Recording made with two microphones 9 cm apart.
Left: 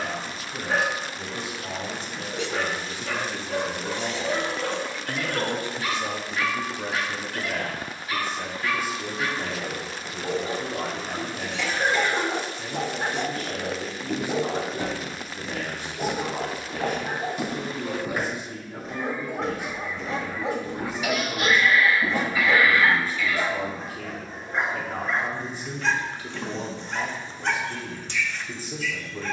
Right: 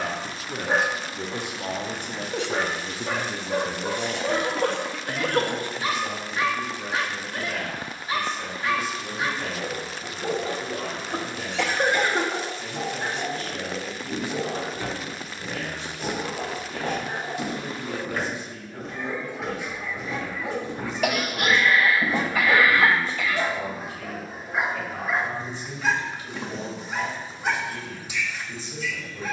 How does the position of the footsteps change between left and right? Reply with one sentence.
In this clip you hear the footsteps move to the right.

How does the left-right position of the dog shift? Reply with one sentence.
In this clip you hear the dog go left and come back.